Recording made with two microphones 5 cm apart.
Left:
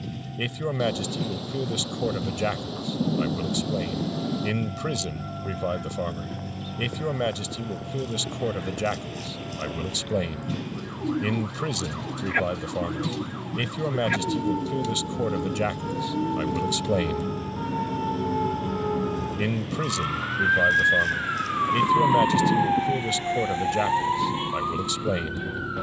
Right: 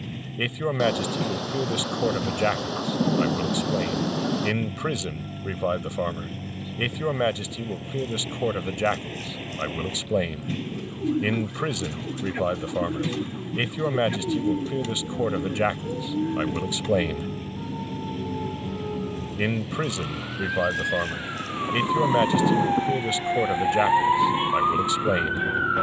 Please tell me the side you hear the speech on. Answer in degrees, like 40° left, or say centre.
30° right.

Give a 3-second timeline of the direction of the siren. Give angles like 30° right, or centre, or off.
80° left, 80° left, 80° left, 80° left, 70° left, 70° left, 50° left, 10° left, 40° right.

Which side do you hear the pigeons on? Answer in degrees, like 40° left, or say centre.
50° right.